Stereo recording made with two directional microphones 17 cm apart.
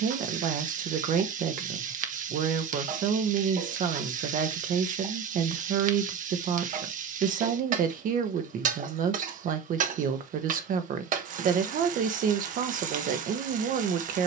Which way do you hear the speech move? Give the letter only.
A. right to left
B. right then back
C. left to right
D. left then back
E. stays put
E.